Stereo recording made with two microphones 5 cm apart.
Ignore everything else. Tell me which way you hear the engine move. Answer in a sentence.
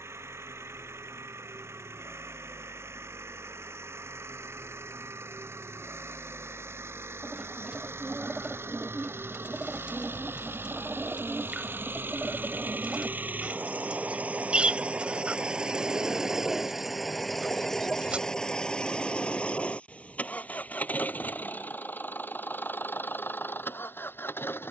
You can hear the engine go from the right side to the left.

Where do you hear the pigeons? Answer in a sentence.
You can hear the pigeons on the right.